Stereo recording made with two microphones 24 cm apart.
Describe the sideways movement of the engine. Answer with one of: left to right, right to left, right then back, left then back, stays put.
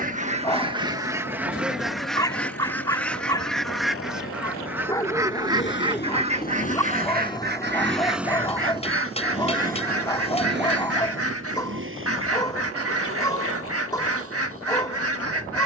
left to right.